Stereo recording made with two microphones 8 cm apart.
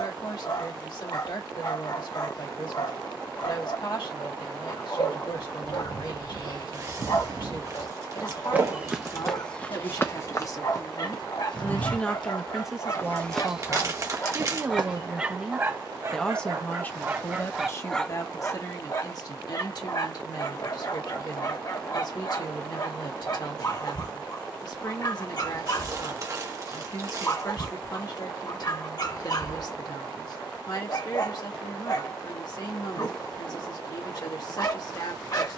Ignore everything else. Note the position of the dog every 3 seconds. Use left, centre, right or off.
left, left, left, left, left, right, left, left, left, left, left, left.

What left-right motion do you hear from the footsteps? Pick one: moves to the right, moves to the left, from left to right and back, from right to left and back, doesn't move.
from right to left and back.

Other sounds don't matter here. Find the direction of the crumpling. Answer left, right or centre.
right.